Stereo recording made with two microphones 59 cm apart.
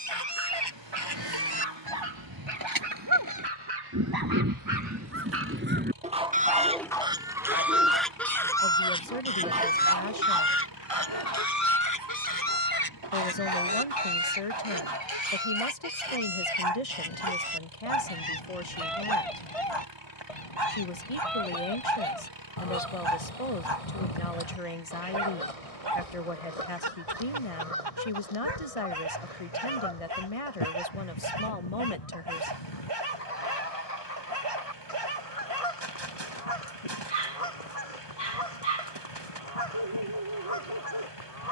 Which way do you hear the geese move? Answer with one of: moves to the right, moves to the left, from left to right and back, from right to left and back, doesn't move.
moves to the left.